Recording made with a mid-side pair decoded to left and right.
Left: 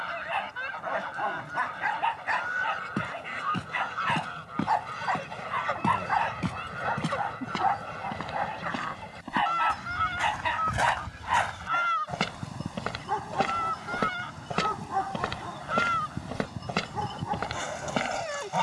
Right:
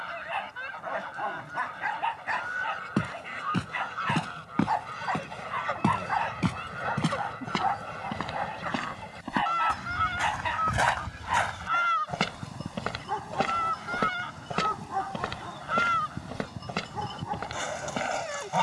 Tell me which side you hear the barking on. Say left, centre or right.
left.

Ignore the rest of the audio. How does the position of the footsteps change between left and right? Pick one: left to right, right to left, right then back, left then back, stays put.
right to left.